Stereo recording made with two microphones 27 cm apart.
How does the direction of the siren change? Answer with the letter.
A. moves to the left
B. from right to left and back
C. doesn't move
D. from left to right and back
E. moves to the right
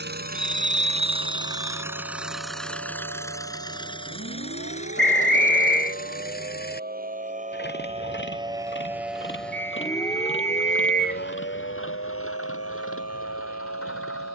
A.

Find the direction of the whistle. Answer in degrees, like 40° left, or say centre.
40° left.